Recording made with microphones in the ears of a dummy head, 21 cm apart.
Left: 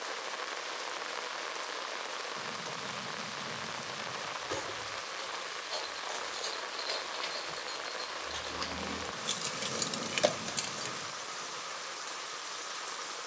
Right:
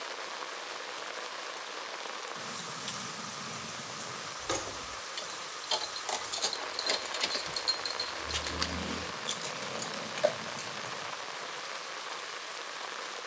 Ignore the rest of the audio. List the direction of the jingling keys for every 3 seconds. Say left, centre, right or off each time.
off, right, right, left, off.